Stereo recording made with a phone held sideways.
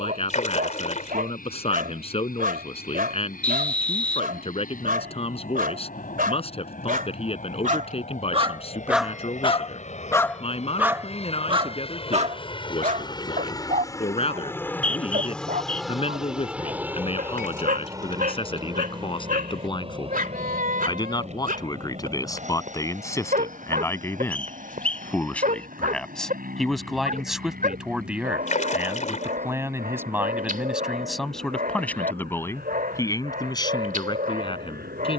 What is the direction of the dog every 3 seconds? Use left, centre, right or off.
right, right, right, centre, right, right, right, right, right, right, right, right.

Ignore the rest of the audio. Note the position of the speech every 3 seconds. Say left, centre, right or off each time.
left, left, left, left, left, left, left, left, centre, centre, centre, left.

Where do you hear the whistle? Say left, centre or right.
centre.